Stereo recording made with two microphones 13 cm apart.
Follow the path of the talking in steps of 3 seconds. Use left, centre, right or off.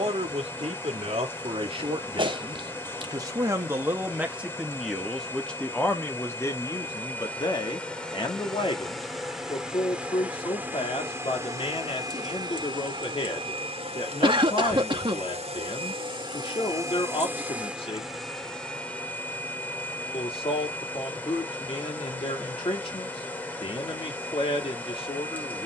right, centre, left, left, left, left, left, left, left.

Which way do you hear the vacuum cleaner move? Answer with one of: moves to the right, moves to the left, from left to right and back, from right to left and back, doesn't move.
from left to right and back.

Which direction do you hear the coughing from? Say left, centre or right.
right.